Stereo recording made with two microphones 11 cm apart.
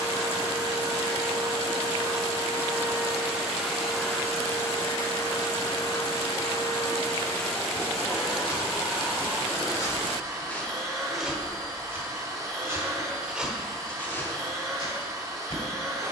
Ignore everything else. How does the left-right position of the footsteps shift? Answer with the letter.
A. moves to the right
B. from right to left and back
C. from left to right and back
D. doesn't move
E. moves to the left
C.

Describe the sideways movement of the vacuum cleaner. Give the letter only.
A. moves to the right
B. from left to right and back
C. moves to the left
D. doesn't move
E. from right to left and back
E.